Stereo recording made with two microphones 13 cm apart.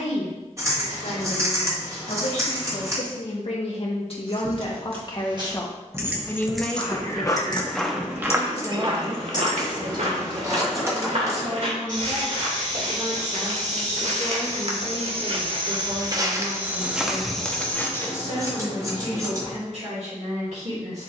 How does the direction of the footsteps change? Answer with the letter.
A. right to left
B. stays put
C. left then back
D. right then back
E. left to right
D.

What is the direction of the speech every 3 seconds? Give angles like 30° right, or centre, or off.
70° left, 50° left, centre, 40° right, 50° right, 60° right, 60° right.